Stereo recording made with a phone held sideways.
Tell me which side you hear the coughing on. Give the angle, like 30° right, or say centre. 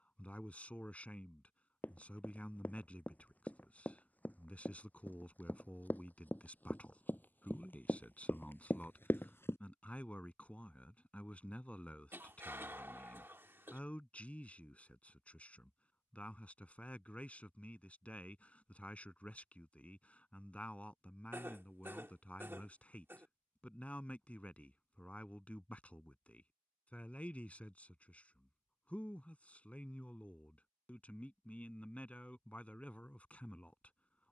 20° right.